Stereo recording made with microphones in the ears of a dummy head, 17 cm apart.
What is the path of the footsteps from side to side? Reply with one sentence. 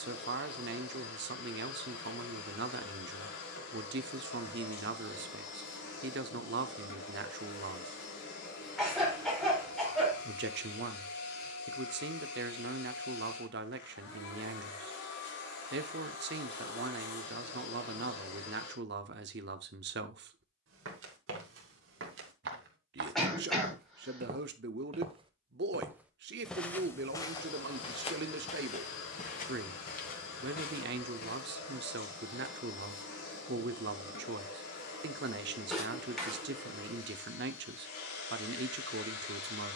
In this clip you hear the footsteps move from right to left.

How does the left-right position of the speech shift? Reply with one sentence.
You can hear the speech stay put.